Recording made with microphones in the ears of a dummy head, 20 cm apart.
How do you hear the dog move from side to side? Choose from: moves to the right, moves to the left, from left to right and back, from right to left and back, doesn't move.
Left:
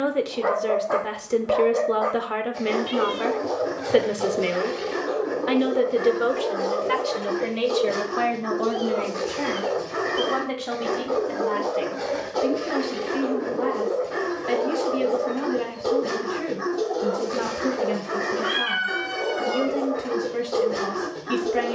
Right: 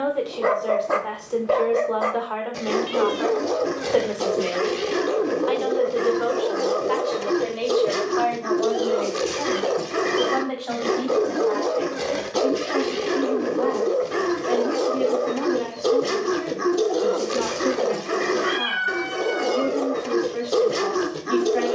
doesn't move.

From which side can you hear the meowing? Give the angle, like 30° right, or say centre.
centre.